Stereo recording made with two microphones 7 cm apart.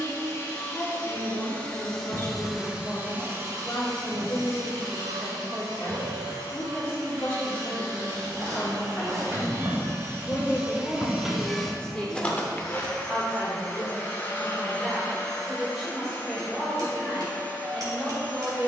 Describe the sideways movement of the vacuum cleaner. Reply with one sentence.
You can hear the vacuum cleaner go right and come back.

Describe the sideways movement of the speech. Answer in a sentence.
You can hear the speech go from the left side to the right.